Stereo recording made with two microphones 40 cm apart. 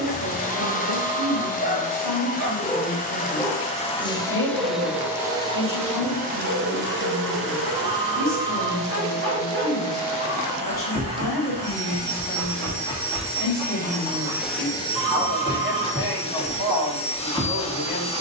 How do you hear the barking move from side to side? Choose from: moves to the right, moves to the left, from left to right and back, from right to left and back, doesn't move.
from left to right and back.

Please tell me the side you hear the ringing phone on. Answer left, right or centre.
right.